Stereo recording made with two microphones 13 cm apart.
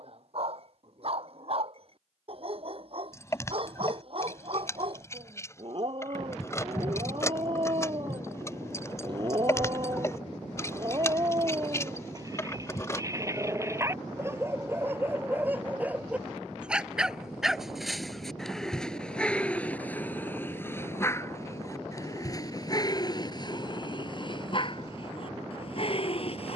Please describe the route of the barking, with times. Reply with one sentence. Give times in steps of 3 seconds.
In this clip you hear the barking on the right from 0 s, in the centre from 15 s and on the left from 21 s.